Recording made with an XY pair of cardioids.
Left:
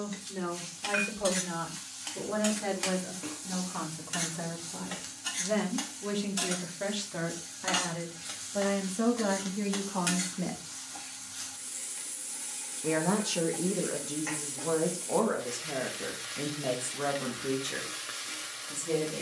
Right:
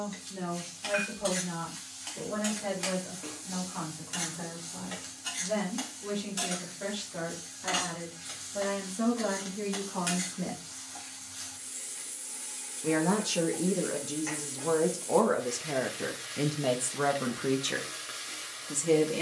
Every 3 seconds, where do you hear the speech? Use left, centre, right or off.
left, left, left, left, centre, right, right.